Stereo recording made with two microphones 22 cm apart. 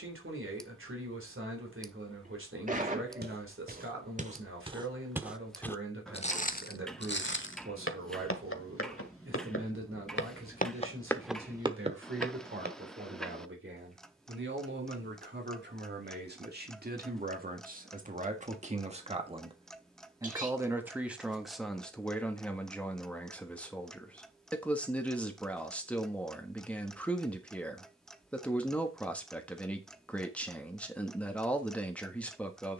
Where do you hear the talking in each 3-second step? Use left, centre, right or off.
right, right, right, right, right, right, right, centre, centre, centre, centre.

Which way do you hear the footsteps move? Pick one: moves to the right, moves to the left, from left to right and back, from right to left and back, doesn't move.
from right to left and back.